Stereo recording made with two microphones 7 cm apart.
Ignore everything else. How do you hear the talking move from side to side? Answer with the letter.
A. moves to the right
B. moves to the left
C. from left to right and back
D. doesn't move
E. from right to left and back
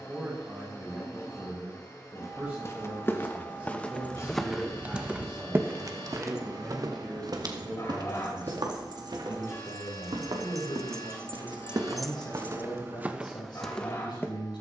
B.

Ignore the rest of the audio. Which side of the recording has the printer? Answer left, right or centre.
left.